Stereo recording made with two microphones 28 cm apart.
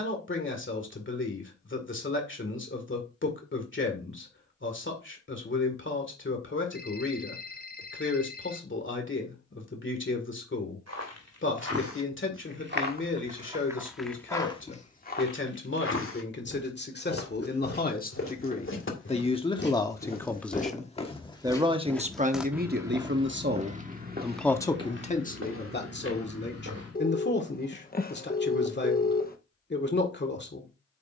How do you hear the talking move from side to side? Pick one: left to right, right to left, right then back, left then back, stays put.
right then back.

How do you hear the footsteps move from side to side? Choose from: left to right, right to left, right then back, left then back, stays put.
left then back.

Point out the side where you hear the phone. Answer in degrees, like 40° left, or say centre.
30° left.